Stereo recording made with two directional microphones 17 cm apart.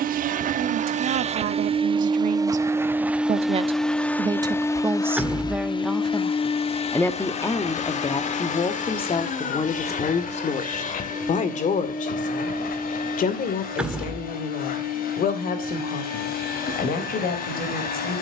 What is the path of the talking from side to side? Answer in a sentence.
You can hear the talking travel towards the left.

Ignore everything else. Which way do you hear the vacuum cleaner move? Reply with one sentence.
You can hear the vacuum cleaner go from the right side to the left.